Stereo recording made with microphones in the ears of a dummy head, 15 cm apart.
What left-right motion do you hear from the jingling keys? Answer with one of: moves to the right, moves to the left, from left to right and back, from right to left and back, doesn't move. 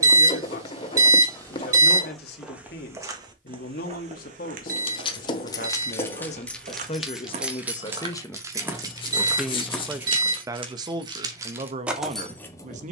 from left to right and back.